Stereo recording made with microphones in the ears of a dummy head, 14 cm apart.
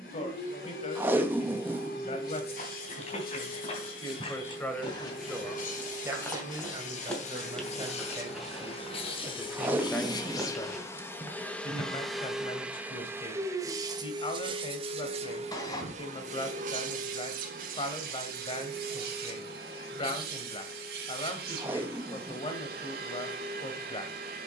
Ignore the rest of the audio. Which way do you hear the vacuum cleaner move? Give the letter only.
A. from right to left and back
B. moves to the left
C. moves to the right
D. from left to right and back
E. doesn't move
C.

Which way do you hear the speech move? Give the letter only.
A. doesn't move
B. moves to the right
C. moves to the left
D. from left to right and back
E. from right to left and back
D.